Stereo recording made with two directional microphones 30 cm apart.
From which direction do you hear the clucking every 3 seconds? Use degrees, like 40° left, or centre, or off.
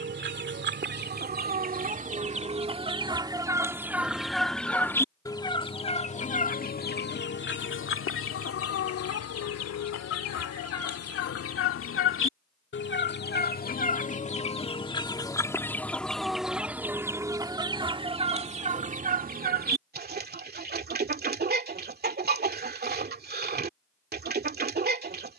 30° right, centre, 40° left, 50° left, 30° left, centre, 30° right, 30° right, 30° right.